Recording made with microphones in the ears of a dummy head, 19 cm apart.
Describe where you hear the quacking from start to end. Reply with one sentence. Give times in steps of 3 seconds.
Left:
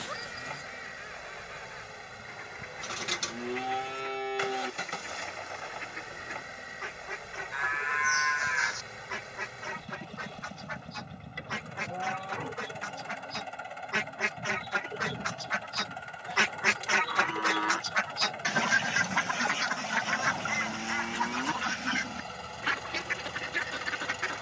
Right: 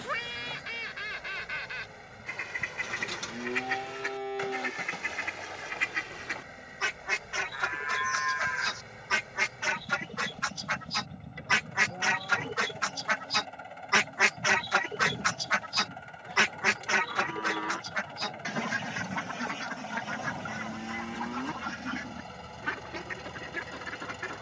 In this clip you hear the quacking on the right from 0 s, in the centre from 15 s and on the left from 18 s.